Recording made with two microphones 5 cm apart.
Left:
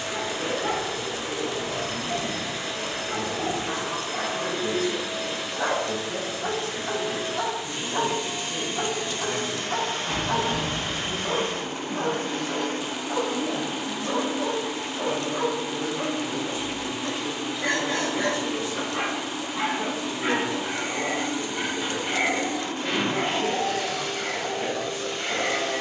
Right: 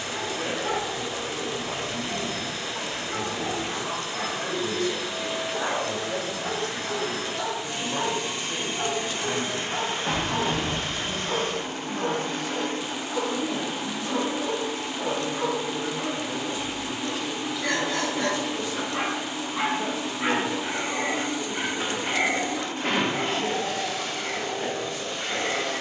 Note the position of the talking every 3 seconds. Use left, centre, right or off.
right, right, right, right, right, centre, left, left, left.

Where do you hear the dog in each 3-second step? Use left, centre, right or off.
left, left, left, left, left, left, centre, centre, left.